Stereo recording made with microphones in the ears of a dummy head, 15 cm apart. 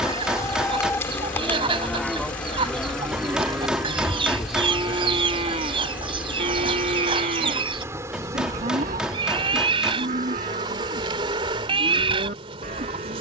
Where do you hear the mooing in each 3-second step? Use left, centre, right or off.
centre, right, right, right, right.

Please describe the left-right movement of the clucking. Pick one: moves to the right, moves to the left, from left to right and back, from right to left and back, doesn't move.
doesn't move.